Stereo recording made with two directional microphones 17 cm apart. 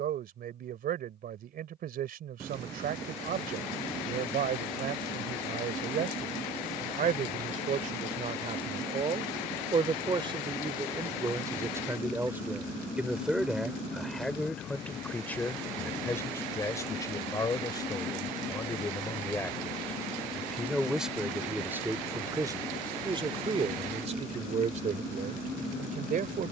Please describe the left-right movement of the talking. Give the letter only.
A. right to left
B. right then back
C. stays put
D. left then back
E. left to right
D.